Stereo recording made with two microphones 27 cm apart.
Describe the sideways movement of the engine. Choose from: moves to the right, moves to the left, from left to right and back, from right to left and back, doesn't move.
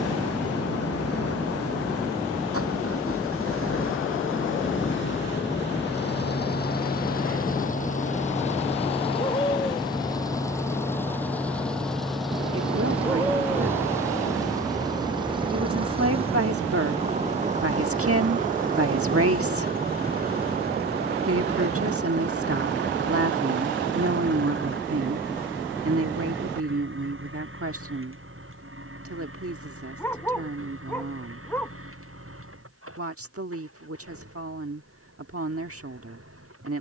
moves to the right.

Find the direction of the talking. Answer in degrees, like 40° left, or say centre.
60° right.